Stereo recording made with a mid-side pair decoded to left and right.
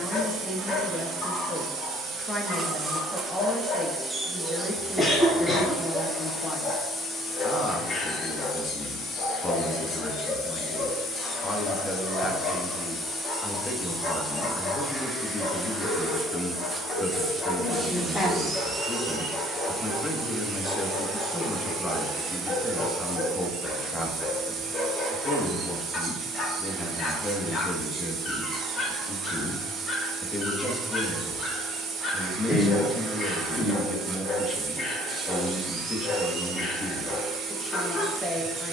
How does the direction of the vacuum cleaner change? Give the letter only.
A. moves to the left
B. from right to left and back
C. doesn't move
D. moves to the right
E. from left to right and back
B.